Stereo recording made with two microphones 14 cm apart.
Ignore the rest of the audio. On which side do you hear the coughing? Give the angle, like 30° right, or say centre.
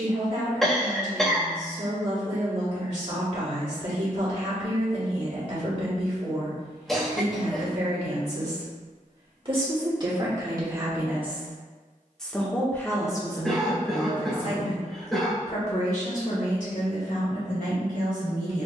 centre.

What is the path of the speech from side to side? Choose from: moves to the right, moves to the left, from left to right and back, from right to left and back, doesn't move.
moves to the left.